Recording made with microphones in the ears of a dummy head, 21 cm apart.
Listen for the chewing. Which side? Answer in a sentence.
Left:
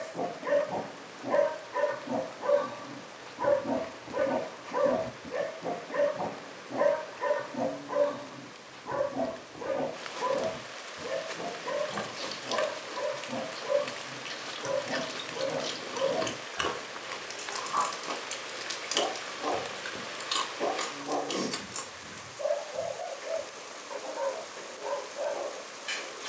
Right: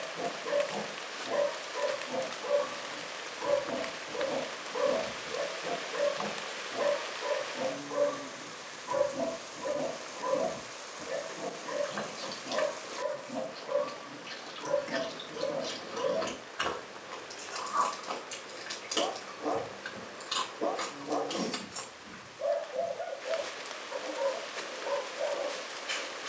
You can hear the chewing on the left.